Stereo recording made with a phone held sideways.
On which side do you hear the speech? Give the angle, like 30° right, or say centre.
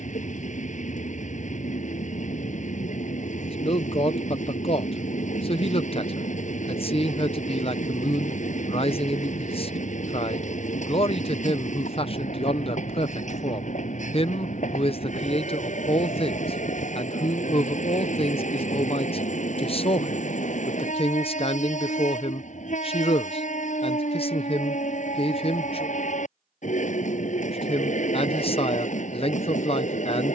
40° left.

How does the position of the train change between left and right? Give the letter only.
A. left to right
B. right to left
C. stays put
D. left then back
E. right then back
C.